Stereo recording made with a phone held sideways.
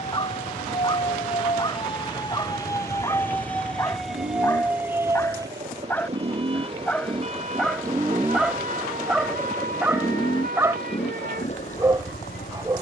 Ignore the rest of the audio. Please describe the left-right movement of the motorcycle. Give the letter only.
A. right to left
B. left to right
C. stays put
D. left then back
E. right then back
A.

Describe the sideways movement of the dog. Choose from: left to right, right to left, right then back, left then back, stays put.
left to right.